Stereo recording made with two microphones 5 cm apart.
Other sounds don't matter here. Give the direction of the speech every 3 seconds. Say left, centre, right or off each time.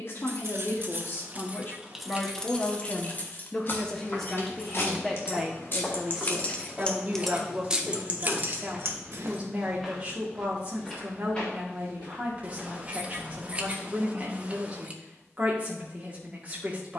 left, centre, right, right, right, right.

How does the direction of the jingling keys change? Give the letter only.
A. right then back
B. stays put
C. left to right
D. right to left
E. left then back
E.